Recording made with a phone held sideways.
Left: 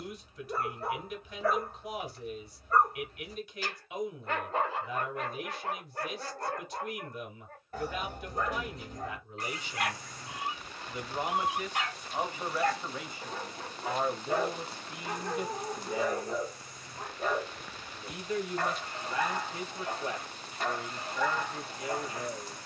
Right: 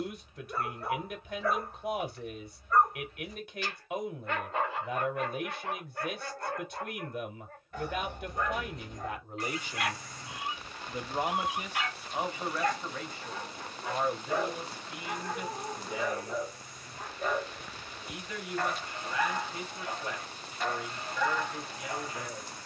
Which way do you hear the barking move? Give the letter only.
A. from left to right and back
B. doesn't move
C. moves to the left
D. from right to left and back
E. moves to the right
B.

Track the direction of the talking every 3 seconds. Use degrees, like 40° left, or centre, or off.
60° right, 60° right, 60° right, 30° right, 20° left, 30° left, 30° left, 30° left.